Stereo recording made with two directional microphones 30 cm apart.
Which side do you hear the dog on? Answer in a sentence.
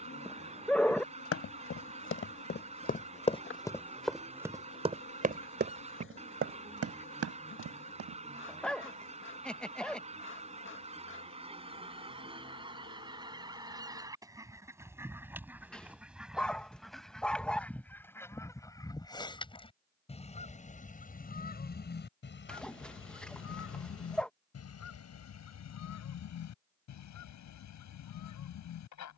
In this clip you hear the dog in the centre.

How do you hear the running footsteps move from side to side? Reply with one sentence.
You can hear the running footsteps travel towards the right.